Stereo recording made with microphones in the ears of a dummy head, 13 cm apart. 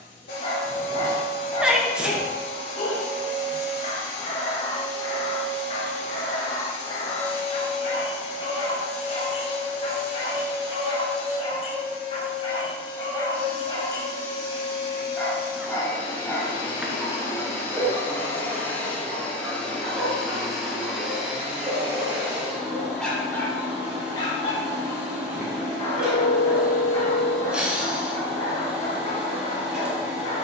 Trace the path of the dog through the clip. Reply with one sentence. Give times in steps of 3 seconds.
In this clip you hear the dog on the left from 0 s, in the centre from 15 s and on the left from 24 s.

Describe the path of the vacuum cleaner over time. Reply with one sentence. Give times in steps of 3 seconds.
You can hear the vacuum cleaner on the left from 0 s and in the centre from 18 s.